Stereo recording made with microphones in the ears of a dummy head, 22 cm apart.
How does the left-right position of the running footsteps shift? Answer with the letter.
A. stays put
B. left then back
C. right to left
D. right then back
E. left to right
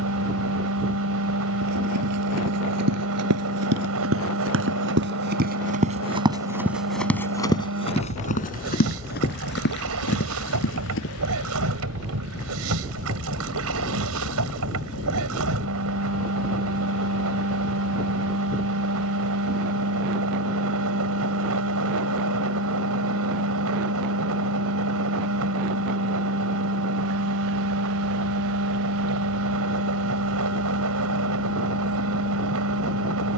C.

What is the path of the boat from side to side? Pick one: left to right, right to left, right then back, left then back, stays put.
stays put.